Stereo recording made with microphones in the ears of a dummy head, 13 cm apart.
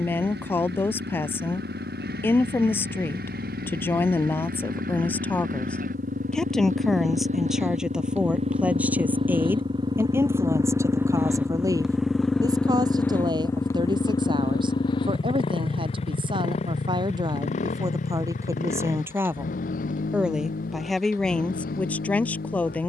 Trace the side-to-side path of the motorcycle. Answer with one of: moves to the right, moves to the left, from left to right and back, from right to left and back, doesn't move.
moves to the left.